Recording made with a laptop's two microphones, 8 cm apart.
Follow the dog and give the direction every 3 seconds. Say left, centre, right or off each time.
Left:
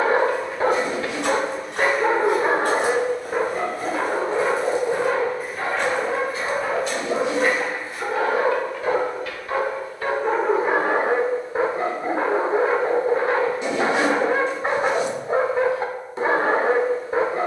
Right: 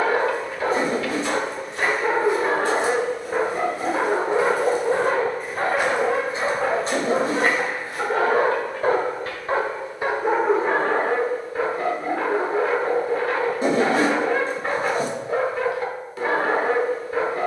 left, right, right, centre, left, left.